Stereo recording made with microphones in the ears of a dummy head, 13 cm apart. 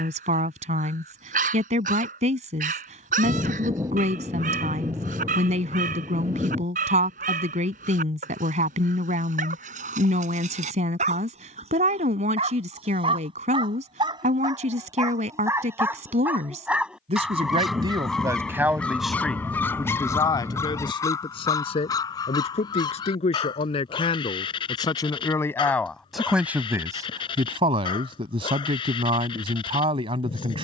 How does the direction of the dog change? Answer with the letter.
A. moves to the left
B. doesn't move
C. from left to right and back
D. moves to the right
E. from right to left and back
A.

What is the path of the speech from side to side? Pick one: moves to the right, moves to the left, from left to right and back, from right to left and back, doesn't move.
from right to left and back.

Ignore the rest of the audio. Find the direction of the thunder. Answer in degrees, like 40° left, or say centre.
20° right.